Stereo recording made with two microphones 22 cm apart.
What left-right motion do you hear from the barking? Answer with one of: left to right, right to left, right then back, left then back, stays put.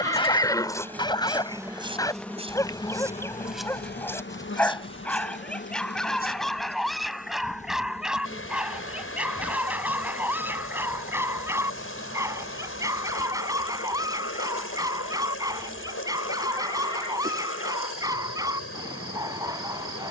left to right.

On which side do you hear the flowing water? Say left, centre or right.
left.